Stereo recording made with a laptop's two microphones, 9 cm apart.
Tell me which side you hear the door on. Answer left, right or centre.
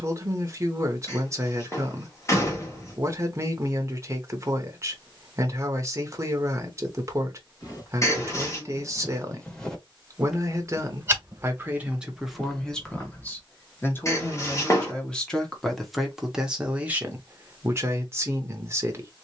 left.